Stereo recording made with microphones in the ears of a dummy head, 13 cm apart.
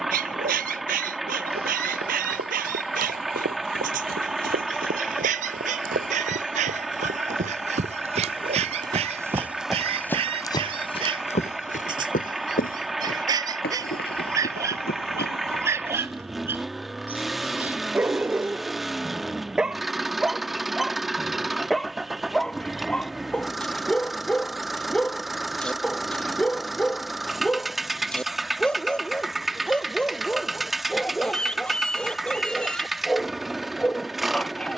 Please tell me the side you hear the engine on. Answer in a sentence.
You can hear the engine in the centre.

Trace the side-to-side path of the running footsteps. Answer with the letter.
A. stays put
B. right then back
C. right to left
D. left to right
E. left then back
C.